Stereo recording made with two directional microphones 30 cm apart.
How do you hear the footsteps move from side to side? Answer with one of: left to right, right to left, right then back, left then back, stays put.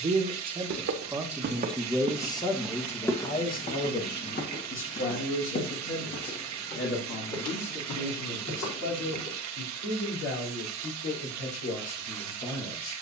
right to left.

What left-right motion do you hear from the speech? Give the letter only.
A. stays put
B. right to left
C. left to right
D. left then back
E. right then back
B.